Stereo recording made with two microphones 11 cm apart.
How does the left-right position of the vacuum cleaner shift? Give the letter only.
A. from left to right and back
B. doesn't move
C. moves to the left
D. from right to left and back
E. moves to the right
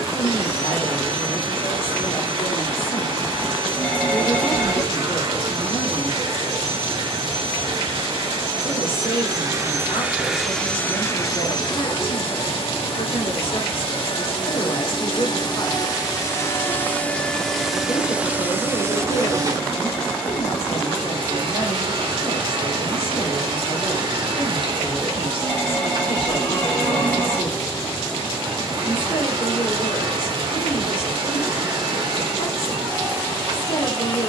D.